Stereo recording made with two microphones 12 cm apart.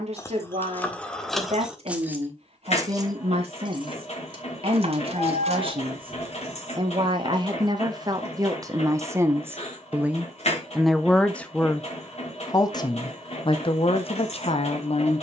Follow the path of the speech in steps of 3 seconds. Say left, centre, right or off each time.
right, right, right, centre, left.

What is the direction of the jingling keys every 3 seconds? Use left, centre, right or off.
centre, right, right, off, off.